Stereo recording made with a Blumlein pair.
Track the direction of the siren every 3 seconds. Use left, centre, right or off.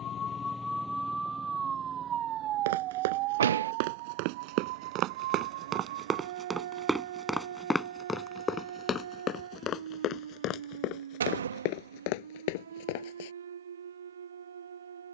centre, right, right, right, right.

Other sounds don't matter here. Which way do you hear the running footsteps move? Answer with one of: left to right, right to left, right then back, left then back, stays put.
right to left.